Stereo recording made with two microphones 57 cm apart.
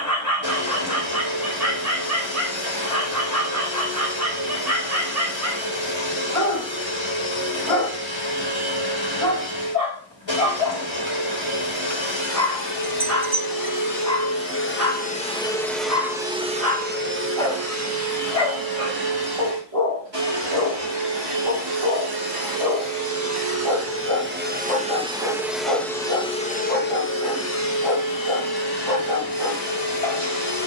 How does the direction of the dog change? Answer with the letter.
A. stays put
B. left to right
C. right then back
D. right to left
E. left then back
A.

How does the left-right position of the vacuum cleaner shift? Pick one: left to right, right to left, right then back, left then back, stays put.
right then back.